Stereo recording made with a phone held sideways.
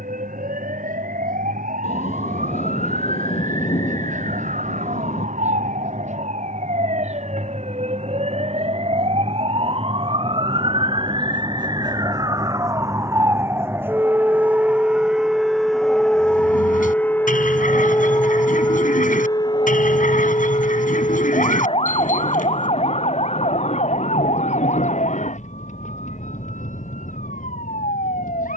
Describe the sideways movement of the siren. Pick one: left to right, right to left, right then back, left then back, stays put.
right to left.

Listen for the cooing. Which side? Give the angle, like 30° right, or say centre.
60° left.